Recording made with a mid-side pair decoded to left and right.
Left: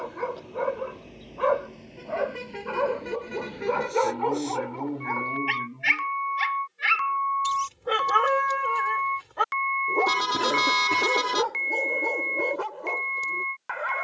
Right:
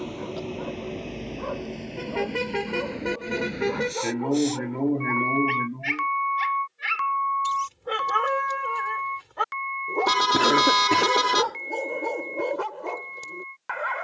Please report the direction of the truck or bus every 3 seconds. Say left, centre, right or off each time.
right, right, centre, left, left.